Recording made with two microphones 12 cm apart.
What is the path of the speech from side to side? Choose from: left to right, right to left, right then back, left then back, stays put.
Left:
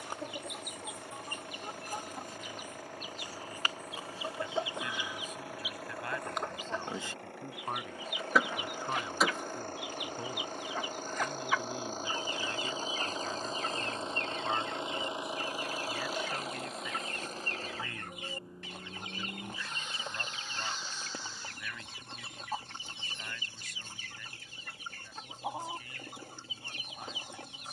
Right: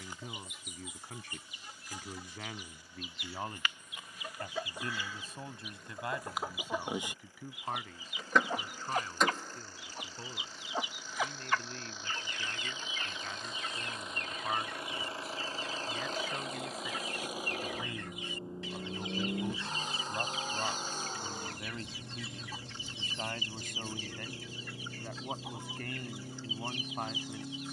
left then back.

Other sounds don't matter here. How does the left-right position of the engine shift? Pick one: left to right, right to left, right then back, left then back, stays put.
left to right.